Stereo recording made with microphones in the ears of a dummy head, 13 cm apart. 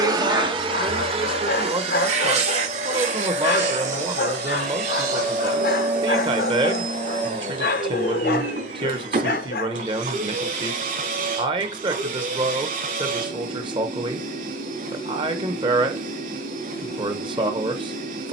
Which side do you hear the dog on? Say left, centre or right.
left.